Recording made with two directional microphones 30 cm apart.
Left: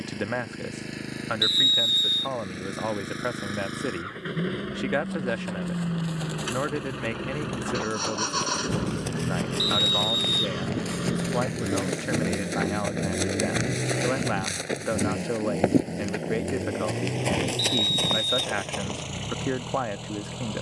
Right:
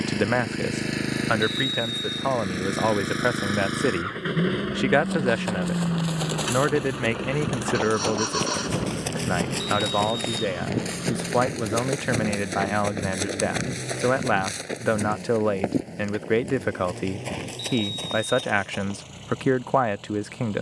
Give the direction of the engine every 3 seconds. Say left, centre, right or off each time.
right, right, centre, left, left, left, left.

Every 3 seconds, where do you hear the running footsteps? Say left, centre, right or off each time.
off, right, right, right, centre, left, left.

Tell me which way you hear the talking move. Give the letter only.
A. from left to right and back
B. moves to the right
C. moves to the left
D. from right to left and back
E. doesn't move
E.